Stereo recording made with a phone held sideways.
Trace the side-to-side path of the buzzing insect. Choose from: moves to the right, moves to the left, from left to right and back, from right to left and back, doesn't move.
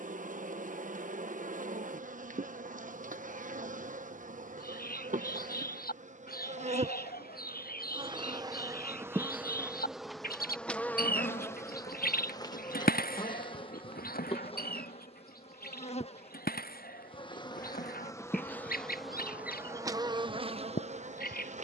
from right to left and back.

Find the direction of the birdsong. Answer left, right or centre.
left.